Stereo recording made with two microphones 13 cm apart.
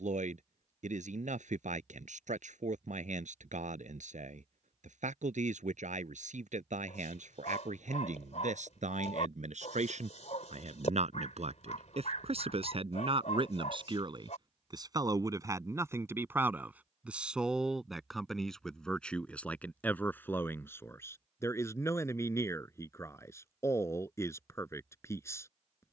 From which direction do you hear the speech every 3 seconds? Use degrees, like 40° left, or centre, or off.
80° right, 80° right, 80° right, 70° right, 50° right, 20° right, 10° left, 20° left, 20° left.